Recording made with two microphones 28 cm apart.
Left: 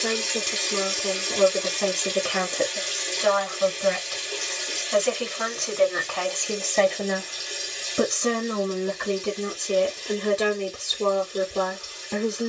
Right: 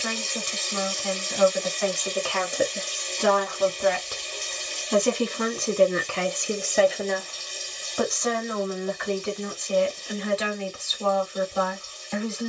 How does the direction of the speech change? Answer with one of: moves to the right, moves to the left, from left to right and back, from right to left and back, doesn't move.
from left to right and back.